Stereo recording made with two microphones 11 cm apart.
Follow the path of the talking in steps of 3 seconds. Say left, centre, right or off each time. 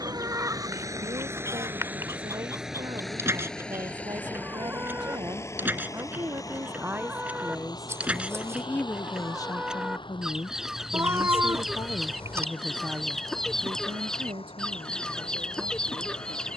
right, right, centre, left, right, right.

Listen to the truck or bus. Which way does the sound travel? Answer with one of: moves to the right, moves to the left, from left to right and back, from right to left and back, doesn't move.
moves to the left.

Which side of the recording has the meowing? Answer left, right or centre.
right.